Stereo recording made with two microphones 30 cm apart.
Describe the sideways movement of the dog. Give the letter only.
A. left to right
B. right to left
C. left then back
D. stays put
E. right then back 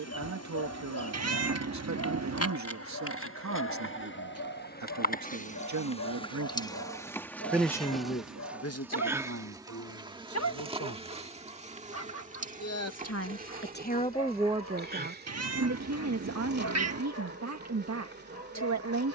D.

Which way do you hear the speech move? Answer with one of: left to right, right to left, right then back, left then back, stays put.
left then back.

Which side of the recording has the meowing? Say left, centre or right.
right.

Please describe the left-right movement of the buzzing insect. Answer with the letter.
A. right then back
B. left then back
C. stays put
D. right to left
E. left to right
E.